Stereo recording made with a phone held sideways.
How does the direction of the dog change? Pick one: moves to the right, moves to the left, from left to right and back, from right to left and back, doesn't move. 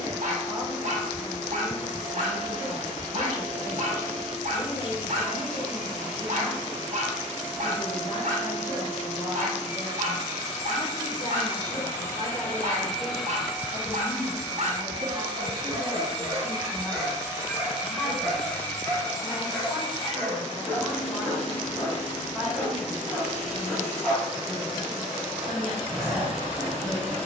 moves to the left.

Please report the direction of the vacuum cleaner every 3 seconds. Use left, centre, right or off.
left, left, left, left, centre, right, left, left, left.